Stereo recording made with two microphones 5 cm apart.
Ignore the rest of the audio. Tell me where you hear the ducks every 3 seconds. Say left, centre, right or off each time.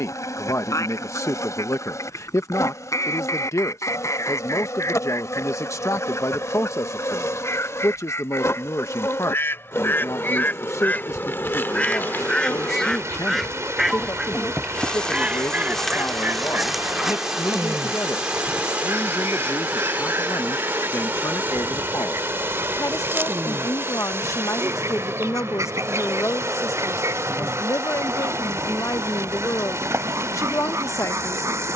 left, left, left, left, centre, right, right, right, right, right, right.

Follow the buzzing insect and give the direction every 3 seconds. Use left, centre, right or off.
left, left, left, left, left, centre, right, right, right, right, right.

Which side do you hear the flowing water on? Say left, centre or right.
right.